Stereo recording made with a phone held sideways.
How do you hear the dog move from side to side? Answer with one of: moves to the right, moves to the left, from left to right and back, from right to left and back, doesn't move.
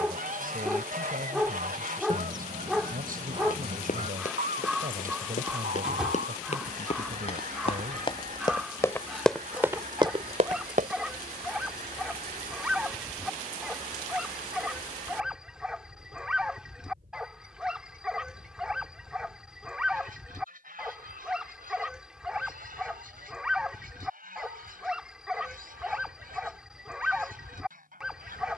doesn't move.